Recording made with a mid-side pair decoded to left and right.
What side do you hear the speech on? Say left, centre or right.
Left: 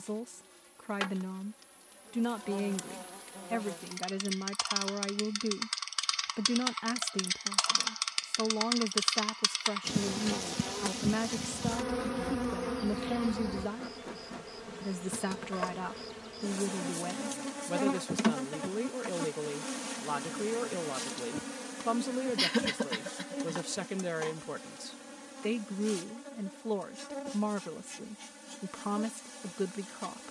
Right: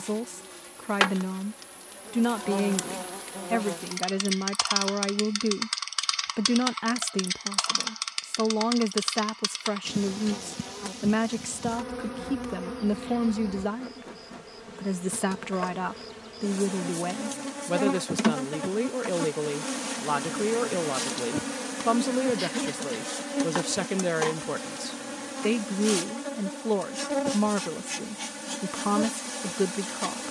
right.